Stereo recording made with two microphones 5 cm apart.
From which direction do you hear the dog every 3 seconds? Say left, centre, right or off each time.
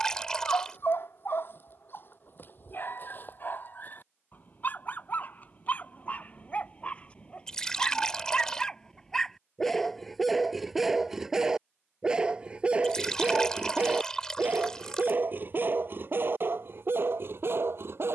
left, left, left, centre, right, right.